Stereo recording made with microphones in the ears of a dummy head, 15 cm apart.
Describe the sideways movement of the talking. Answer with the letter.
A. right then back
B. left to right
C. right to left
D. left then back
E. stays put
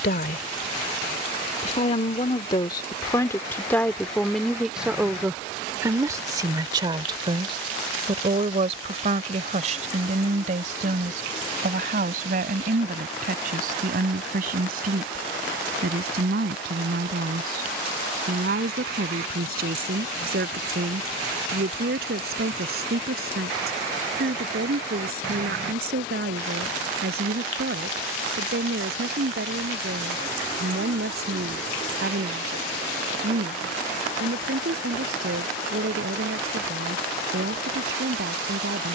B.